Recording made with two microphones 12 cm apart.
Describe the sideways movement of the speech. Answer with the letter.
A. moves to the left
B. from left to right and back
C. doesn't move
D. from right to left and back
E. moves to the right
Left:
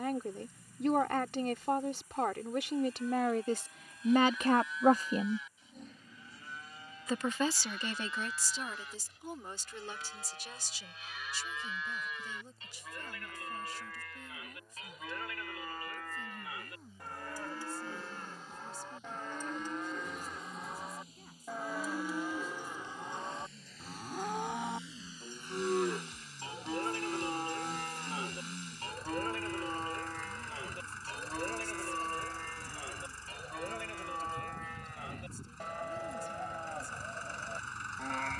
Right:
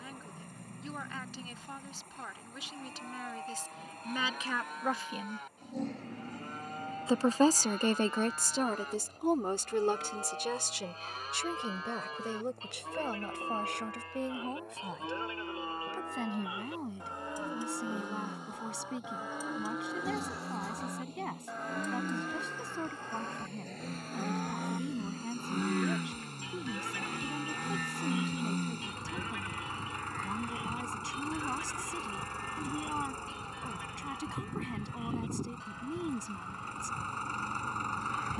E.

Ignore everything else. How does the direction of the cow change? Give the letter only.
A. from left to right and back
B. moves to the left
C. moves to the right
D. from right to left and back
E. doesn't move
B.